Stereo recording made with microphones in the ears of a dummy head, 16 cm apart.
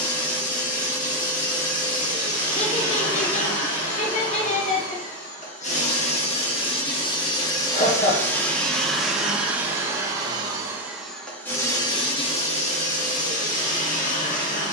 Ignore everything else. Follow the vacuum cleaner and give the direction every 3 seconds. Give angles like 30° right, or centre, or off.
50° left, 40° left, 20° left, centre, 40° left.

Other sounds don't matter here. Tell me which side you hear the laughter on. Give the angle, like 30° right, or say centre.
40° left.